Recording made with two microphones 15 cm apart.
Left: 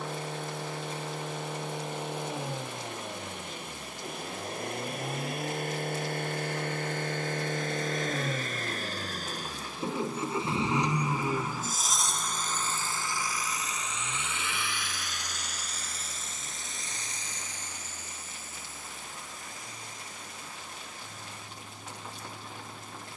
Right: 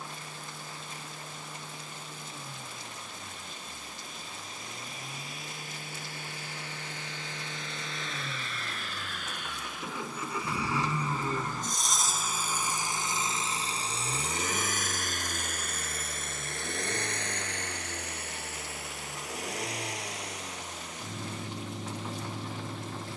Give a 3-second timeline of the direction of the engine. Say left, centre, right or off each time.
left, left, left, left, right, right, right, right.